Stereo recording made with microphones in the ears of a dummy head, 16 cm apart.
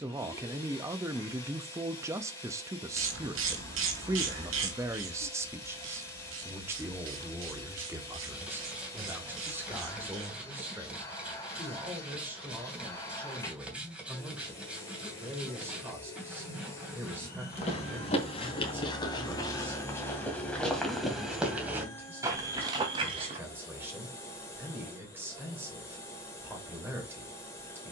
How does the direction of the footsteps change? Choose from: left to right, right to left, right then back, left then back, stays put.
left to right.